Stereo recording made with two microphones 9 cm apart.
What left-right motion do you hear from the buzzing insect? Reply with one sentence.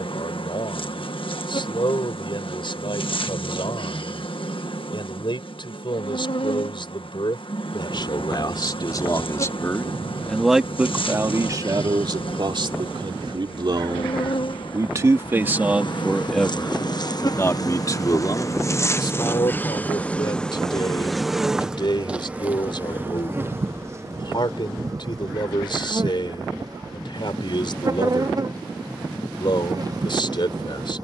You can hear the buzzing insect move to the right.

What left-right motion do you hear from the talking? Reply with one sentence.
You can hear the talking go right and come back.